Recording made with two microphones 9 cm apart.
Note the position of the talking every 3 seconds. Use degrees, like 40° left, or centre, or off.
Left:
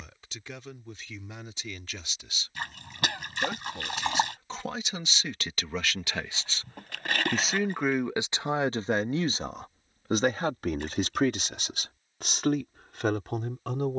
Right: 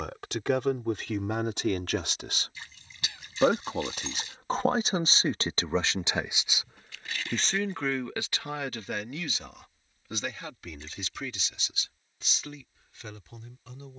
70° right, 40° right, 10° left, 50° left, 60° left.